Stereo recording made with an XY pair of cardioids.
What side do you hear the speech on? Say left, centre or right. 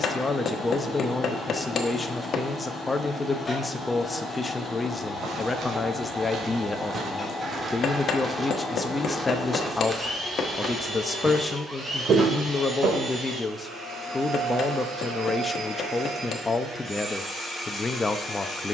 left.